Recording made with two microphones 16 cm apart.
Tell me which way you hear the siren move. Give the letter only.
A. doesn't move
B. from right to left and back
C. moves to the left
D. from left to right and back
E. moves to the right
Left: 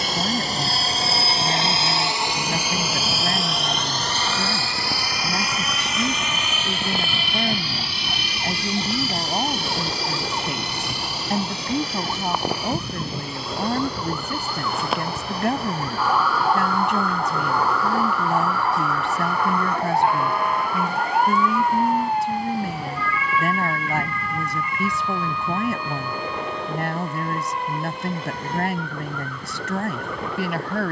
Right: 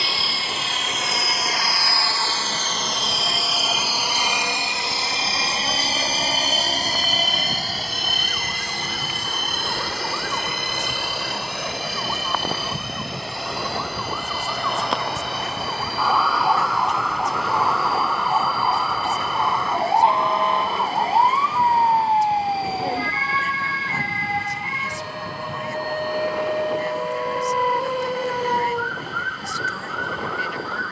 E.